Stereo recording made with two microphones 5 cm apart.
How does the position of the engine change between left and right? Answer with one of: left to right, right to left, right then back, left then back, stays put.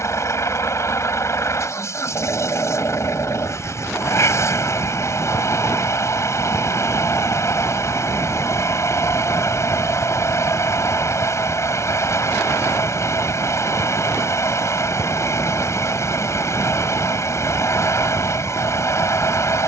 stays put.